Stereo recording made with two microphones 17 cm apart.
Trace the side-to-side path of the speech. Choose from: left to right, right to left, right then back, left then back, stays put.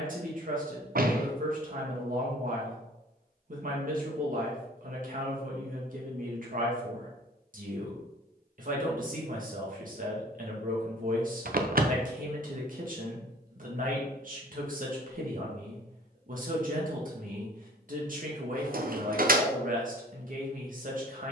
stays put.